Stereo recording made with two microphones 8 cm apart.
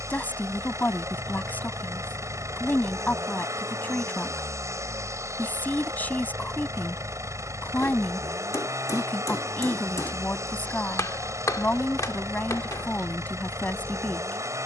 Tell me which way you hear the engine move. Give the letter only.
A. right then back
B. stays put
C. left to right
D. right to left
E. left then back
B.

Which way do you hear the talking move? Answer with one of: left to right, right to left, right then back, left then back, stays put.
stays put.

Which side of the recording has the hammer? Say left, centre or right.
left.